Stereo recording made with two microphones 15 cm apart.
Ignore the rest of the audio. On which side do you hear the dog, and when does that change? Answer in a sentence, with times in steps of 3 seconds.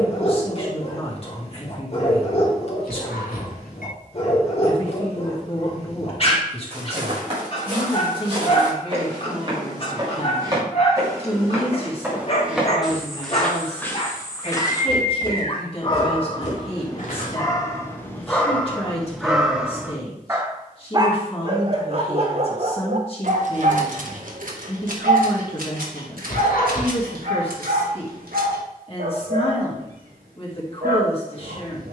In this clip you hear the dog on the left from 0 s, in the centre from 18 s and on the right from 21 s.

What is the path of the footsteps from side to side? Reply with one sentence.
In this clip you hear the footsteps go from the right side to the left.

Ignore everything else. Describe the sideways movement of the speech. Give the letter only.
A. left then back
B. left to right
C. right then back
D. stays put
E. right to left
D.